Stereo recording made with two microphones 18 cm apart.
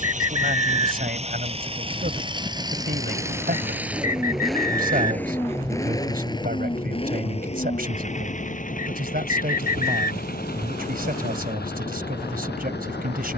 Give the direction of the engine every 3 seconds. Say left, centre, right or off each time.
right, centre, left, left, left.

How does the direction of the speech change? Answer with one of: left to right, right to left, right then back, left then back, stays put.
stays put.